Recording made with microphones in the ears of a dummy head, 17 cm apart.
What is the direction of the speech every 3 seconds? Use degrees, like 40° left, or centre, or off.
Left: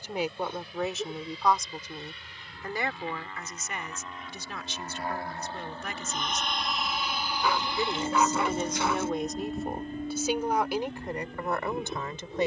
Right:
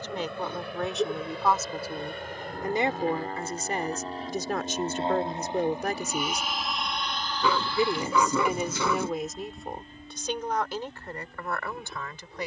centre, 40° right, 20° right, 10° left.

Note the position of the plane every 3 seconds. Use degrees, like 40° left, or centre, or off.
50° right, 30° right, 10° left, 50° left.